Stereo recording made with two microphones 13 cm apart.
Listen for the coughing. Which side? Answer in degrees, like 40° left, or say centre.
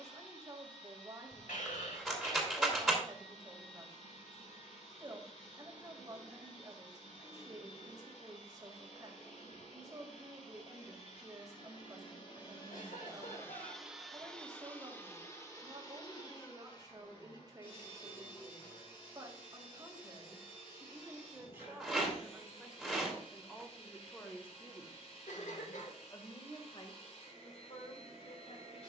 70° left.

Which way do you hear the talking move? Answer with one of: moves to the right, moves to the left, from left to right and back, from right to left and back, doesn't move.
moves to the left.